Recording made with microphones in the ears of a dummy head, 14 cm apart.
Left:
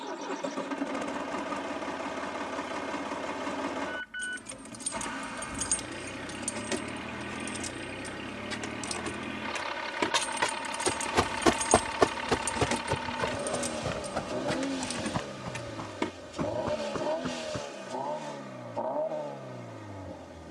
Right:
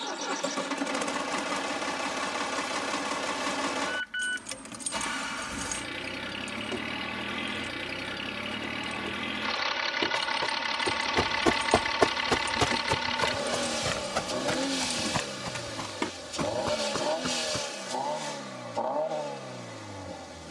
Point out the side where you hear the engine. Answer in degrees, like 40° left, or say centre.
70° right.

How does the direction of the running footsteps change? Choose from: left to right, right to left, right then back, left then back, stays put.
left to right.